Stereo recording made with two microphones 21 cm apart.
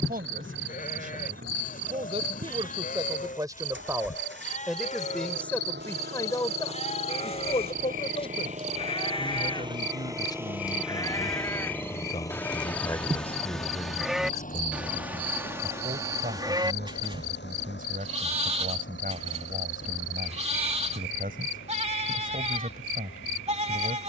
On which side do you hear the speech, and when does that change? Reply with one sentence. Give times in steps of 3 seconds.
You can hear the speech on the right from 0 s, in the centre from 3 s, on the left from 6 s, in the centre from 12 s and on the right from 15 s.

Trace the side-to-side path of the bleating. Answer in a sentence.
You can hear the bleating move from left to right.